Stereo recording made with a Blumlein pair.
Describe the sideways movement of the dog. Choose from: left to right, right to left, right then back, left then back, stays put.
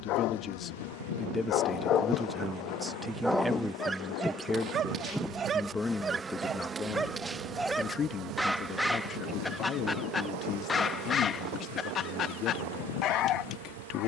right then back.